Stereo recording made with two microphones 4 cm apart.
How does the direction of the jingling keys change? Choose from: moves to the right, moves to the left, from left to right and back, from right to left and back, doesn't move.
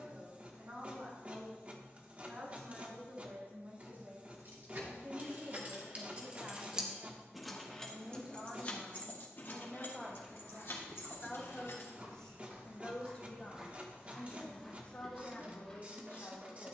moves to the left.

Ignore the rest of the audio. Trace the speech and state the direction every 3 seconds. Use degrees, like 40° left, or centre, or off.
50° right, 40° right, 20° right, centre, 30° left, 40° left.